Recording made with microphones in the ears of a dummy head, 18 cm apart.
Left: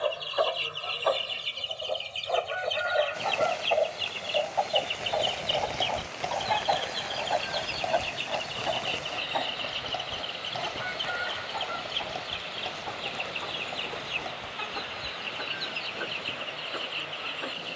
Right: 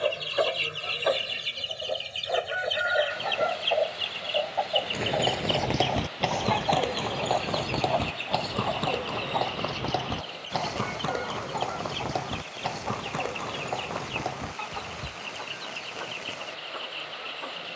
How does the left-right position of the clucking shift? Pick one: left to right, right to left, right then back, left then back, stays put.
right to left.